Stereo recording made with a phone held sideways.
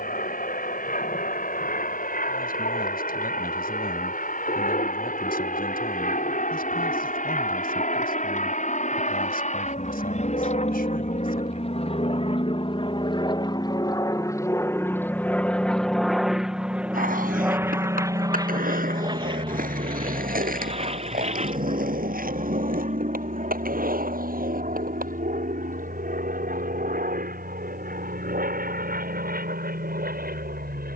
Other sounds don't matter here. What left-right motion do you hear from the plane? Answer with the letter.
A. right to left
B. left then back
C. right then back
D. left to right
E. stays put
D.